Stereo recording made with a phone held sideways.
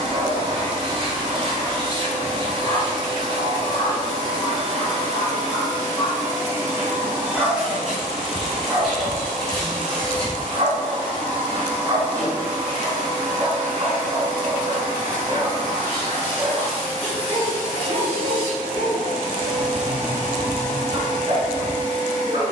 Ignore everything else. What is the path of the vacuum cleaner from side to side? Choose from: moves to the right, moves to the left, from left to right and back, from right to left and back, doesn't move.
moves to the left.